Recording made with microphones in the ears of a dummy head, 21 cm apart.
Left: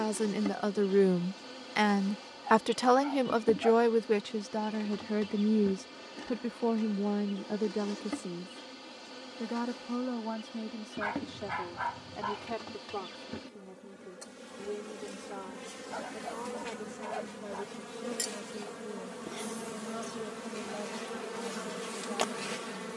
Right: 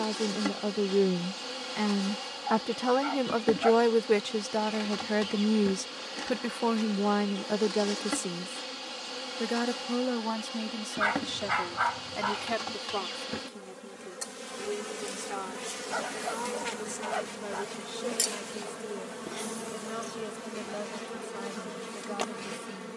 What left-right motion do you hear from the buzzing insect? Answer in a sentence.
In this clip you hear the buzzing insect travel towards the left.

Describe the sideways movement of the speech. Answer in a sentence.
You can hear the speech go from the left side to the right.